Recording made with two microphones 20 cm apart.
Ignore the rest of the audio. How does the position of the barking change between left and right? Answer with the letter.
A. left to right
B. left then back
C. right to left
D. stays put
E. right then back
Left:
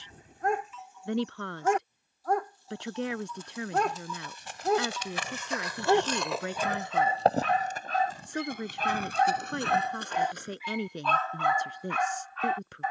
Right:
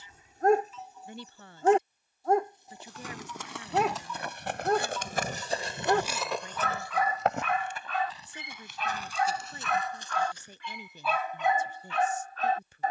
B.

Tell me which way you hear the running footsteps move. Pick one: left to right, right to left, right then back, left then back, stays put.
right to left.